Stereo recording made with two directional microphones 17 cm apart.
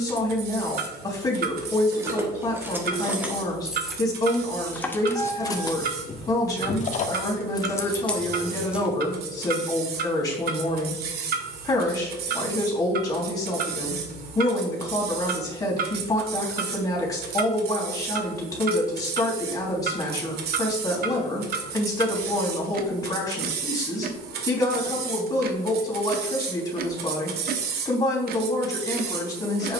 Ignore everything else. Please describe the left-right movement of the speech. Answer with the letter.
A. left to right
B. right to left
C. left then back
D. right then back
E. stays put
E.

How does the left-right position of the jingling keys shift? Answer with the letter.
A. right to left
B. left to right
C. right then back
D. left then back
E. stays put
D.